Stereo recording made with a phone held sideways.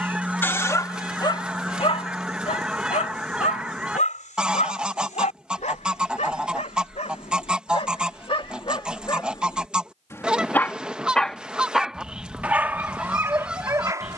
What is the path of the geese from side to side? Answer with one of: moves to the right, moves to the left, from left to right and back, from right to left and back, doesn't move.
doesn't move.